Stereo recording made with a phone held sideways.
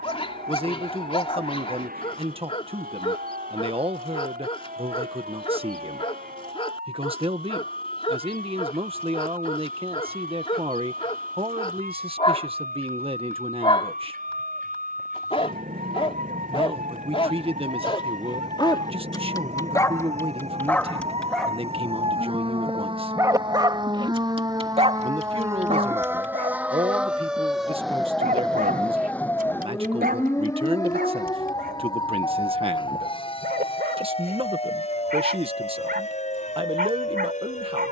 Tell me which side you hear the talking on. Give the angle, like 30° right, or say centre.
40° right.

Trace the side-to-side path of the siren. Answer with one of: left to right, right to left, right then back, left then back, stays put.
right to left.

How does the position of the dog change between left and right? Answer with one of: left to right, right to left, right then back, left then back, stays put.
left to right.